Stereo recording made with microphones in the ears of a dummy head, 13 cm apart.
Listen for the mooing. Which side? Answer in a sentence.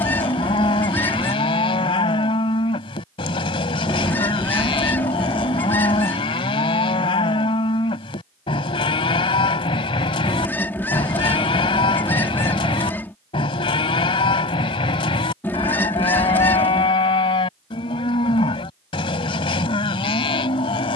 In this clip you hear the mooing on the left.